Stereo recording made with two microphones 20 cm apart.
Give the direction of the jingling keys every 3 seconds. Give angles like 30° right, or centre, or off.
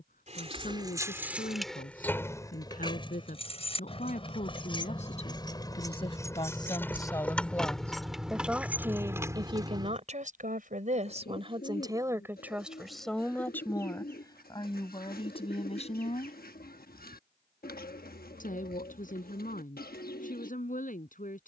centre, 20° left, centre, 20° right, off, off, off.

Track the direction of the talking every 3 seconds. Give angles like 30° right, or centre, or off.
40° left, 30° left, 10° left, 30° right, 10° left, 30° left, 40° left.